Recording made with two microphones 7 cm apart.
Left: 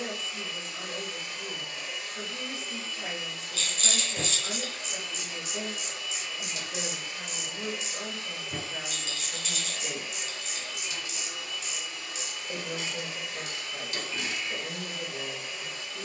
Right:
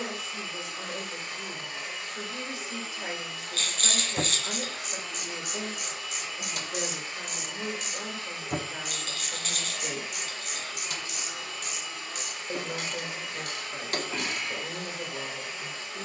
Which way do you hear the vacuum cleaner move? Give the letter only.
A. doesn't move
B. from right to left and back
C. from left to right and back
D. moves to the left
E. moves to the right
A.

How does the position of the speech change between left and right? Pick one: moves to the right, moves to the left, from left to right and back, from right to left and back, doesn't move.
doesn't move.